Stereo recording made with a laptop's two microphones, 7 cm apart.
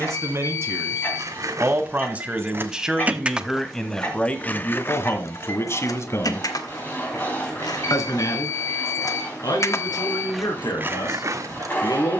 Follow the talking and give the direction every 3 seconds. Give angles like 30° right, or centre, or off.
30° right, 20° left, 50° left, 70° left.